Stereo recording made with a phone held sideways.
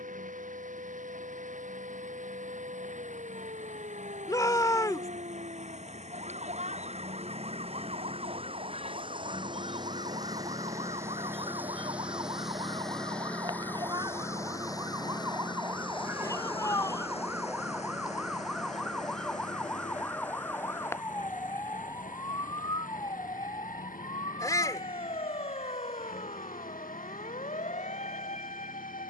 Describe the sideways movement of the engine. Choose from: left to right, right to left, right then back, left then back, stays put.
right to left.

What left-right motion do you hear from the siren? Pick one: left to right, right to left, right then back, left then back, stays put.
right to left.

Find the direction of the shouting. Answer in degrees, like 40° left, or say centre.
20° left.